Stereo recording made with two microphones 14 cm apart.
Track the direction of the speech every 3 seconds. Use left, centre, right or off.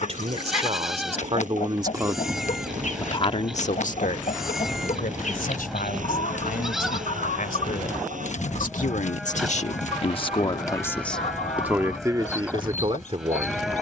right, left, left, left, right.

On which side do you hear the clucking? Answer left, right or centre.
left.